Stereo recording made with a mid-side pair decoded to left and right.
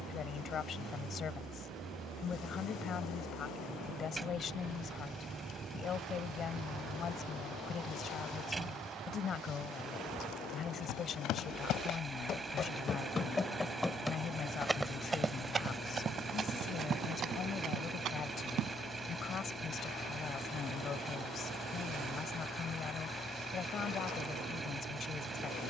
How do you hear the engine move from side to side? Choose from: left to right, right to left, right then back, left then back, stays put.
stays put.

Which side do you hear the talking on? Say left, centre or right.
left.